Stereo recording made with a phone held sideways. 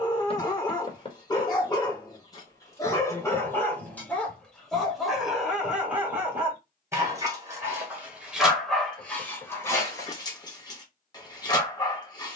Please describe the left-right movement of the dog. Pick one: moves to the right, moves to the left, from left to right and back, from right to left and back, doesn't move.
from left to right and back.